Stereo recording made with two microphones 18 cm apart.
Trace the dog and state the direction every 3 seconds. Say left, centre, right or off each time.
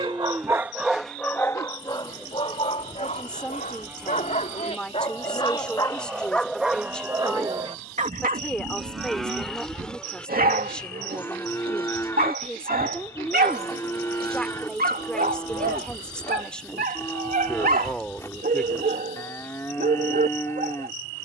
centre, left, right, right, right, right, right.